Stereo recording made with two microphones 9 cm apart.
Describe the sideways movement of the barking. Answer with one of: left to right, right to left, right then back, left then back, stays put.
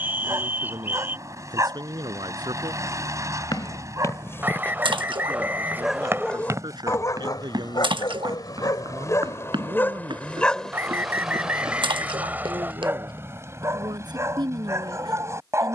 left then back.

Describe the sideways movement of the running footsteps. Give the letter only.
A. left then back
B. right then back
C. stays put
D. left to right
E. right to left
D.